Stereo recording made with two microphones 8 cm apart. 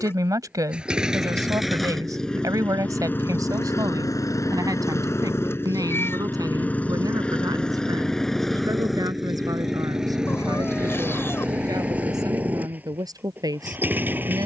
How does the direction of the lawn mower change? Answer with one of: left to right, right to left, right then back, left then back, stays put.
left then back.